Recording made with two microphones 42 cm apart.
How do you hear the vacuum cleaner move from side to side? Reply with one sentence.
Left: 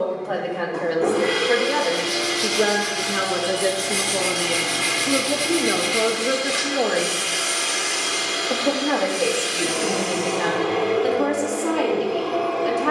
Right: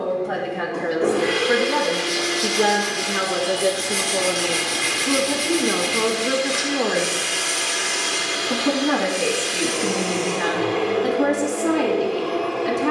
In this clip you hear the vacuum cleaner stay in one place.